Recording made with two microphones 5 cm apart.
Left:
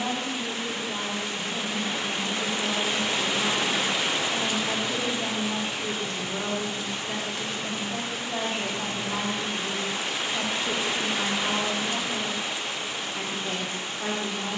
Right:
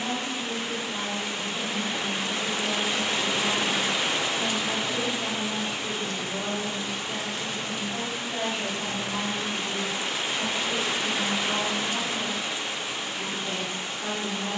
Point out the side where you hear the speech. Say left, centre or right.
left.